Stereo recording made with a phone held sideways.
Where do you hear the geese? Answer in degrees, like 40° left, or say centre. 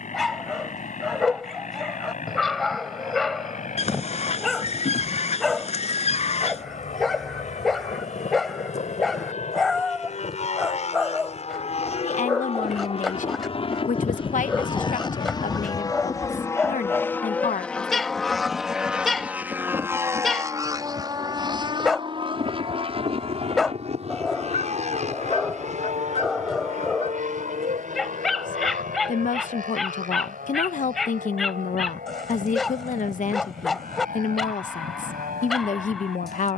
50° left.